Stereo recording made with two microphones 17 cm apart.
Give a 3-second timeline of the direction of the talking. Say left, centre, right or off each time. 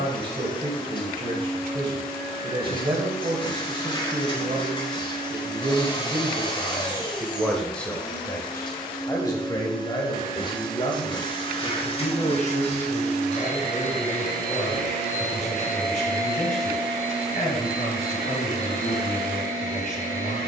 right, right, centre, left, left, left, left.